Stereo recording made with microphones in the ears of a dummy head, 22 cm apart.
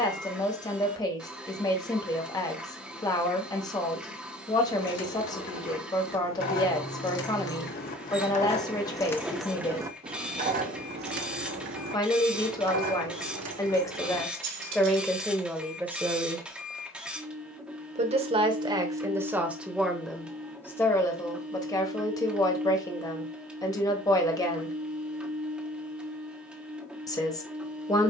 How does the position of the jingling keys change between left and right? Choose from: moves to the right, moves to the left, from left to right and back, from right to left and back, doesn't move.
moves to the right.